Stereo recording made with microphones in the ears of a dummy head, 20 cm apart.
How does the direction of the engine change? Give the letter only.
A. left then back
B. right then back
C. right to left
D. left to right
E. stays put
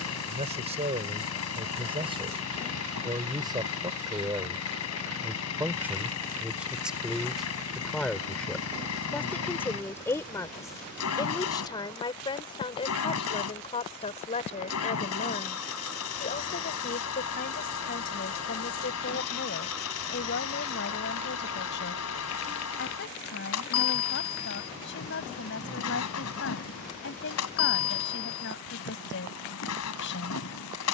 E.